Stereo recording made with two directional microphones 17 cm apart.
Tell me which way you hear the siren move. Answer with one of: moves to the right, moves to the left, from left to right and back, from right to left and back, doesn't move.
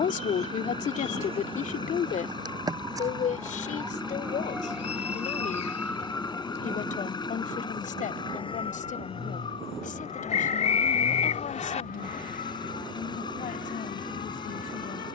moves to the left.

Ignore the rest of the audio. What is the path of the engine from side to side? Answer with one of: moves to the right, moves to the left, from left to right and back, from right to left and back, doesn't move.
doesn't move.